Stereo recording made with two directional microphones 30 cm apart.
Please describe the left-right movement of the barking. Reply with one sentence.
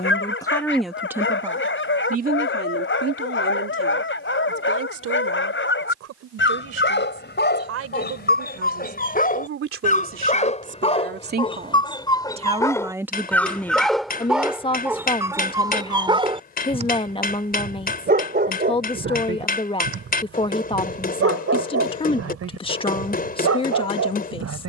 You can hear the barking go from the left side to the right.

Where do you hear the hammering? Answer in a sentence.
In this clip you hear the hammering on the left.